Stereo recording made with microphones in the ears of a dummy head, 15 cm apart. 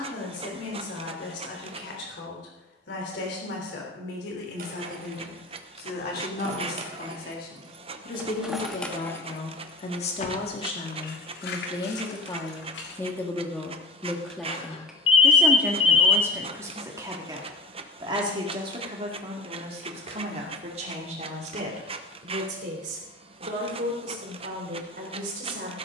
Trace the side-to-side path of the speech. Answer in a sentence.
In this clip you hear the speech move to the right.